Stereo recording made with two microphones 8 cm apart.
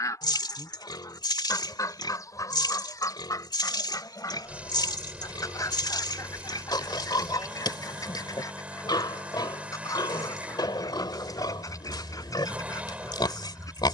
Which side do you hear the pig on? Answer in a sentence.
You can hear the pig on the left.